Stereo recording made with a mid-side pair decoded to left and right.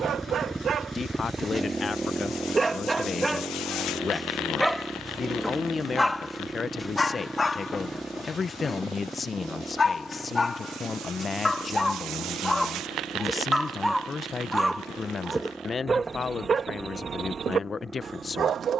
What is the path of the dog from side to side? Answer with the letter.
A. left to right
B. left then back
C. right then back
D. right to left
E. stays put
B.